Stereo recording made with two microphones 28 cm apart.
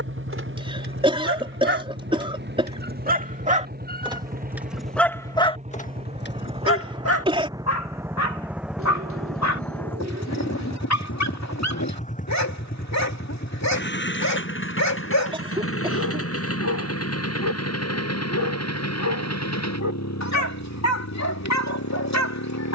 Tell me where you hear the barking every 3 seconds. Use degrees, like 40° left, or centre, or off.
40° right, centre, 60° left, 70° left, 70° left, 70° left, 70° left, 70° left.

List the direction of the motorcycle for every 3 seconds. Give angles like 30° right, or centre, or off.
40° right, 30° right, 10° right, 10° left, 40° left, 50° left, 70° left, 70° left.